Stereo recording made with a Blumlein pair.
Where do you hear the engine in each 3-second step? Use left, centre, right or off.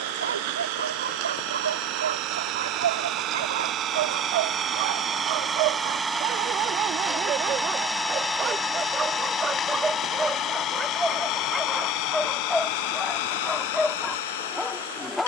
right, right, centre, left, left.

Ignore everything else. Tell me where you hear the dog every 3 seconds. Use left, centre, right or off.
right, right, right, centre, centre.